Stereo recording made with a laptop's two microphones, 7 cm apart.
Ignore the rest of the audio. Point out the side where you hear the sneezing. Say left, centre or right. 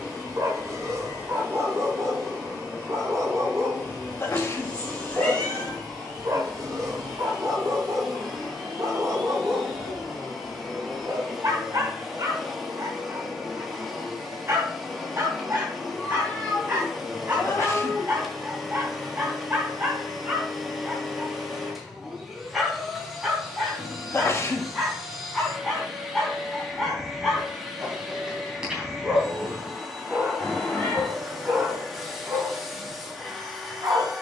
left.